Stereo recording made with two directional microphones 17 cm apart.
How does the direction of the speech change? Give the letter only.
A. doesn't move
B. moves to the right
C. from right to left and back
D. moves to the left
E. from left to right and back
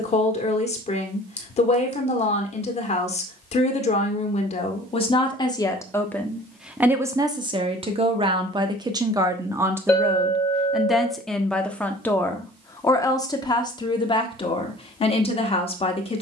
E.